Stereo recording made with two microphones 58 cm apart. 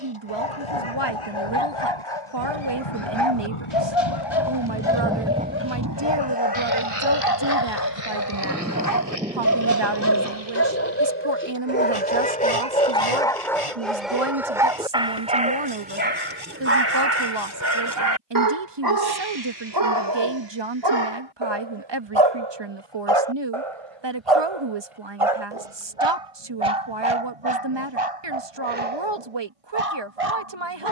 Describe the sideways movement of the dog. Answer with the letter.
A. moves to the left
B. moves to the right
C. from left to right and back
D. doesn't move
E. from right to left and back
B.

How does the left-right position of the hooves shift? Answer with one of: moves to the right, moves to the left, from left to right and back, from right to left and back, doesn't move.
moves to the right.